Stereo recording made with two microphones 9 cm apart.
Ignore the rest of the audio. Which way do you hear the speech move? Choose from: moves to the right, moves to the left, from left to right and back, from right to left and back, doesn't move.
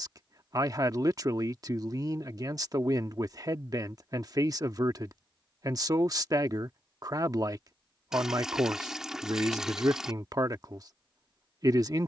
doesn't move.